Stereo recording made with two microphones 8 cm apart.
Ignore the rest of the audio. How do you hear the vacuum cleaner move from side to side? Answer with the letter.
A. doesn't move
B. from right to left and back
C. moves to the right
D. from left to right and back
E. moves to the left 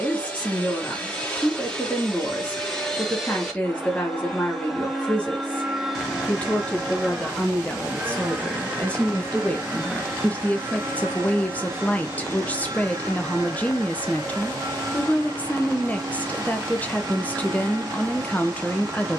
C.